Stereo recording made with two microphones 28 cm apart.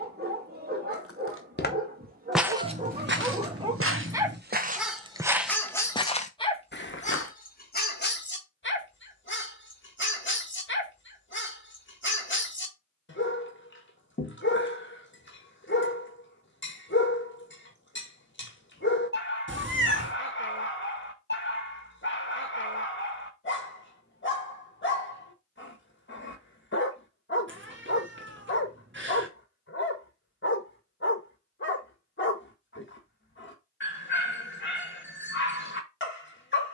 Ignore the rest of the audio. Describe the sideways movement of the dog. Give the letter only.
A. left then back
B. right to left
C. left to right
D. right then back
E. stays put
B.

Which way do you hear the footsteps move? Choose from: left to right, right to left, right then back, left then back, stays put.
right then back.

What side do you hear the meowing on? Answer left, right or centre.
right.